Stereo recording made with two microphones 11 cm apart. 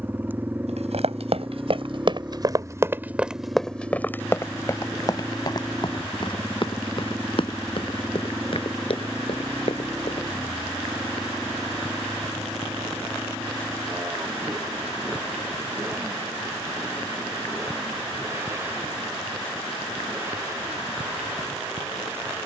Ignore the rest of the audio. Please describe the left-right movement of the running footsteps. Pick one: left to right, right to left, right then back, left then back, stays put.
right to left.